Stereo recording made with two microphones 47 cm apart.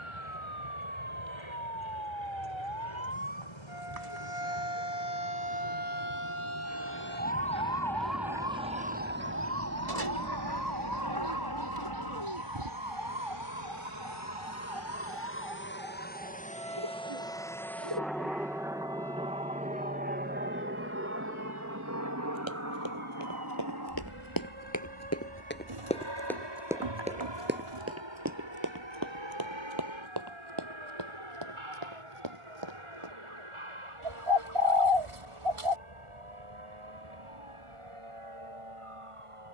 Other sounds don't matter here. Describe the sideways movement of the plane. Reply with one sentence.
You can hear the plane go from the left side to the right.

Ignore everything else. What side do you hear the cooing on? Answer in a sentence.
In this clip you hear the cooing on the right.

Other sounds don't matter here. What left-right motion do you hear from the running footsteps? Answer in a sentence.
You can hear the running footsteps move from left to right.